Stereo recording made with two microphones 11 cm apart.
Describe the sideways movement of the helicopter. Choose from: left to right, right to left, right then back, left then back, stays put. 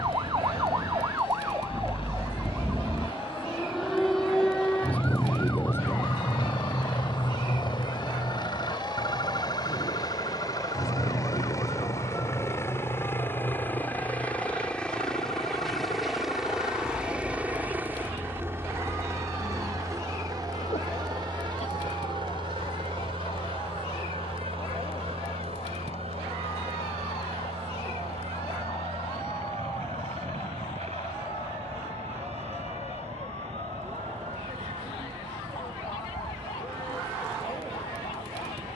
left to right.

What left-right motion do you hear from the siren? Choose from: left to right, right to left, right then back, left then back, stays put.
right to left.